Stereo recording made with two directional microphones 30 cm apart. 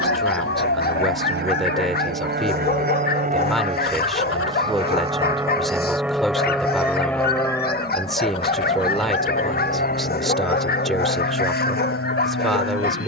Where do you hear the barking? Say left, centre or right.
left.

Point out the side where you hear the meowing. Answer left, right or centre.
left.